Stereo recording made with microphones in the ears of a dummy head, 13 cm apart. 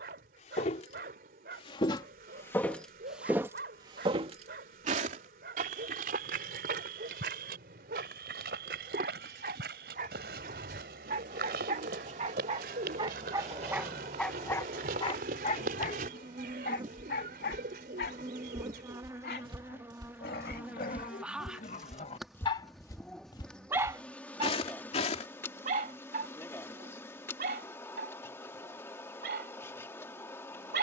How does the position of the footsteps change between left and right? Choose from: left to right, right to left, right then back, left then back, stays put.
right then back.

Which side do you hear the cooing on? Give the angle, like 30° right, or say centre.
70° right.